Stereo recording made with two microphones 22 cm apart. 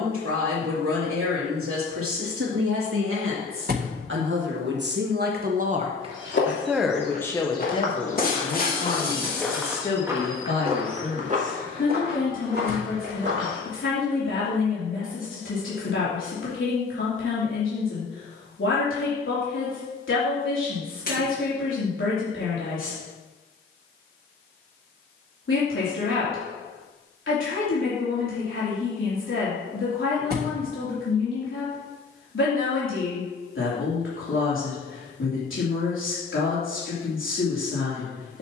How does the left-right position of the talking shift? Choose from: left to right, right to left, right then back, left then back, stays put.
right to left.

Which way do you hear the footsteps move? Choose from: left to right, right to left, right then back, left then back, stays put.
left to right.